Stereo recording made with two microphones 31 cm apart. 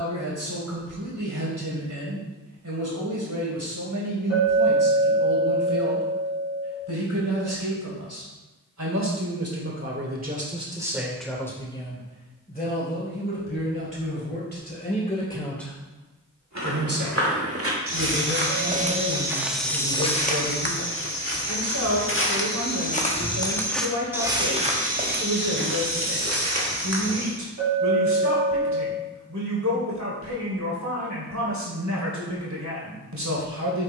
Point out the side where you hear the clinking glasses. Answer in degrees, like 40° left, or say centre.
60° right.